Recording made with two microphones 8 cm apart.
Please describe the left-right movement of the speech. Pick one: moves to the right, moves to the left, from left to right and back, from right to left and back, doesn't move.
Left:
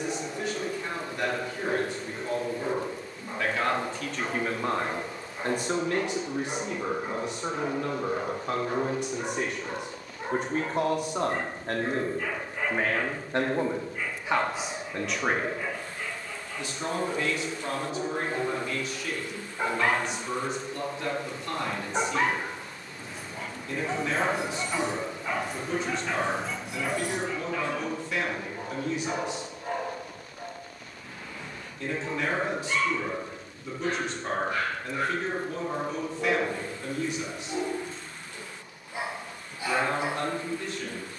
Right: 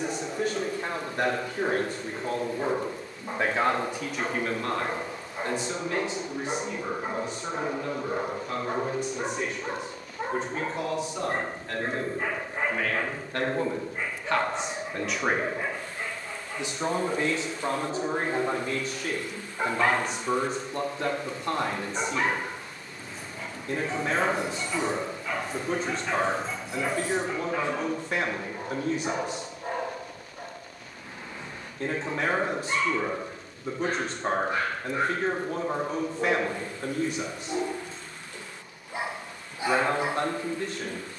from right to left and back.